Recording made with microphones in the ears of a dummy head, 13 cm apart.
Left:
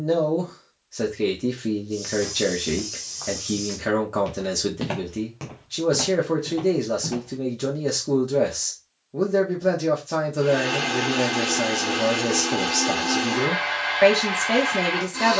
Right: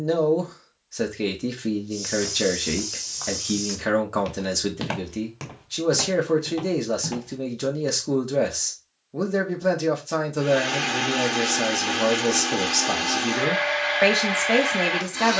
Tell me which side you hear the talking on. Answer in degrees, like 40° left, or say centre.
20° right.